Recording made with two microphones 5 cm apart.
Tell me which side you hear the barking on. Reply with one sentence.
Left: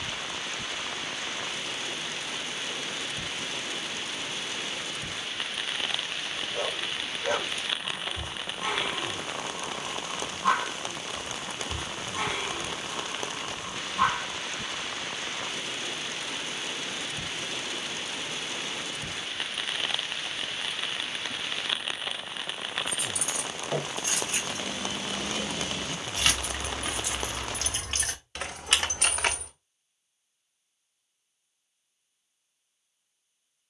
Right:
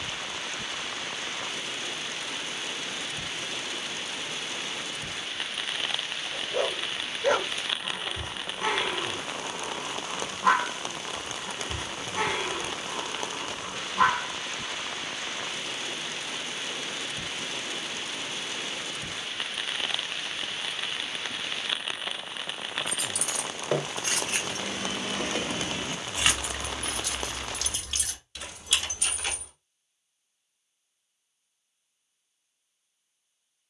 You can hear the barking on the right.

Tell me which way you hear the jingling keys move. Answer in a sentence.
You can hear the jingling keys travel towards the left.